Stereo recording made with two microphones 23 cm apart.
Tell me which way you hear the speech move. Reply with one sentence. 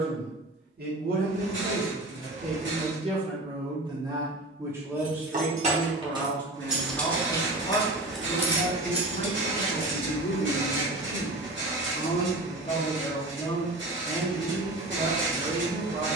You can hear the speech move from right to left and back again.